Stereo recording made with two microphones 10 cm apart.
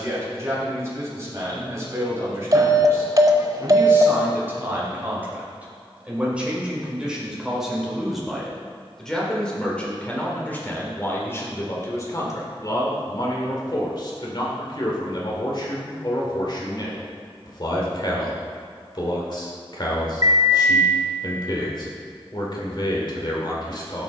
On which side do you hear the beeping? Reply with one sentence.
In this clip you hear the beeping on the right.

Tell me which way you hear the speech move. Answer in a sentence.
You can hear the speech travel towards the left.